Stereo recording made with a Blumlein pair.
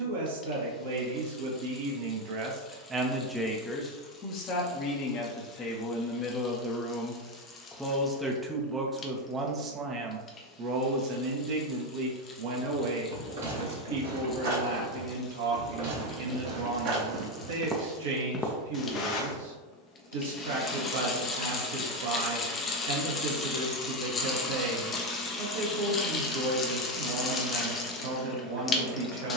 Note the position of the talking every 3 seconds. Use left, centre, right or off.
right, left, centre, right, right, right, right, right, right, right.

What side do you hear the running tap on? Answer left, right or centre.
left.